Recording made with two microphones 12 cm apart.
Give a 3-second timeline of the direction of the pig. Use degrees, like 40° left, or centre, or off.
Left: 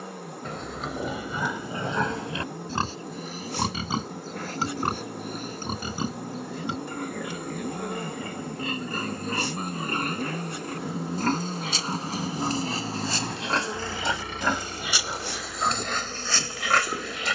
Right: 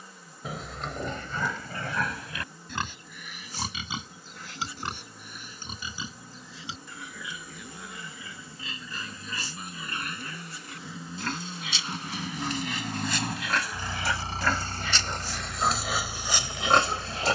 20° left, 40° left, 50° left, 50° left, 30° left, 10° right.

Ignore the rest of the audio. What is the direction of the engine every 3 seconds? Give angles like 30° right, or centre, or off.
70° left, 70° left, 60° left, 40° left, 10° right, 60° right.